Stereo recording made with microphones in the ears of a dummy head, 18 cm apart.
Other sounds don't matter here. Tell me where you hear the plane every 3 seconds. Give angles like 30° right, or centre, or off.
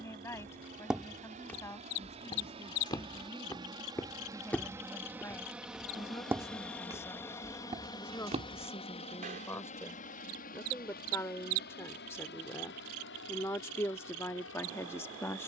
40° right, 20° right, 10° left, 40° left, 60° left.